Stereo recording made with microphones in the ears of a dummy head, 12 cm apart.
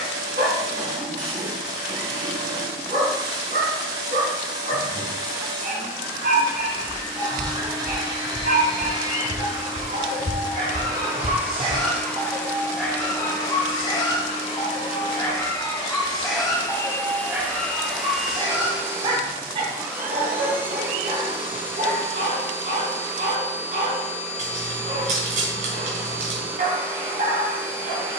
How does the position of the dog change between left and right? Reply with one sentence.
You can hear the dog go left and come back.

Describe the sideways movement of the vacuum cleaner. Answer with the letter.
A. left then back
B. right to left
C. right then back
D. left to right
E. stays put
A.